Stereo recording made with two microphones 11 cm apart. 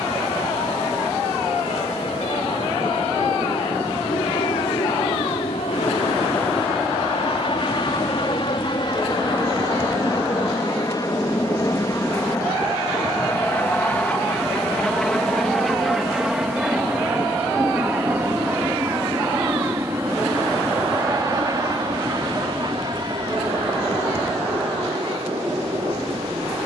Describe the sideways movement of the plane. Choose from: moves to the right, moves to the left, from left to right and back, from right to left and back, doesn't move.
moves to the right.